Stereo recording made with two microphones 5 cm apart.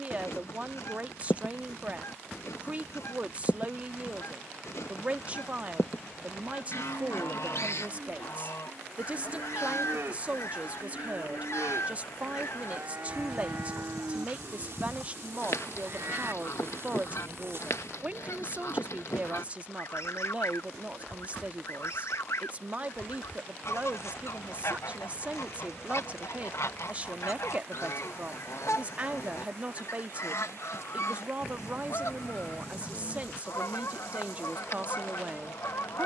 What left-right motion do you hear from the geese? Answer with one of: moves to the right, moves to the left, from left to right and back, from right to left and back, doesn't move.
doesn't move.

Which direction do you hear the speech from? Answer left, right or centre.
right.